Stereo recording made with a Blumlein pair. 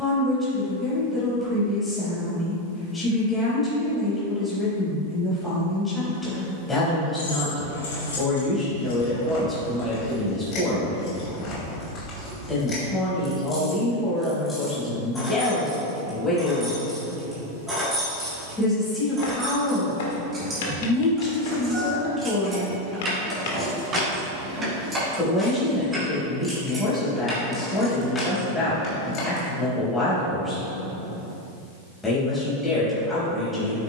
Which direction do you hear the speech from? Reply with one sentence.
In this clip you hear the speech in the centre.